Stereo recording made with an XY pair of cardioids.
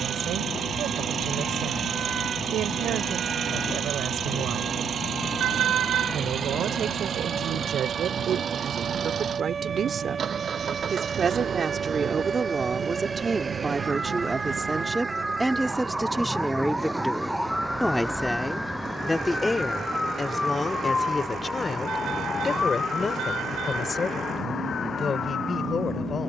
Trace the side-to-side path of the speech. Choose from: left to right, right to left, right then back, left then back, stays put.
right to left.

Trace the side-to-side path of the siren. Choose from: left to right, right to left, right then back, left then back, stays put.
right to left.